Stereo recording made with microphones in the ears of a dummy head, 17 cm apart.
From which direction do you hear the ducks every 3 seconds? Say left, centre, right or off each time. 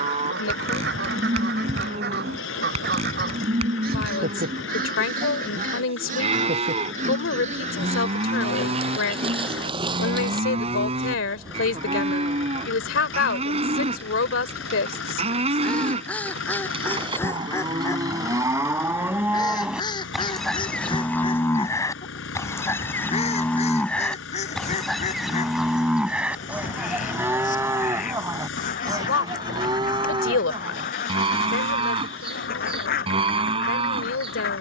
right, right, right, right, centre, centre, left, left, left, left, left, left.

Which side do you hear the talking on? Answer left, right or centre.
left.